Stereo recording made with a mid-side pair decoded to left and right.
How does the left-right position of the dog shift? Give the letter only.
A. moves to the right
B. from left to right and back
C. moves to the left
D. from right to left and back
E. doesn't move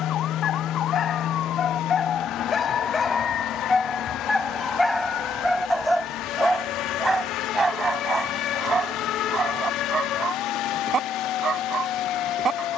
A.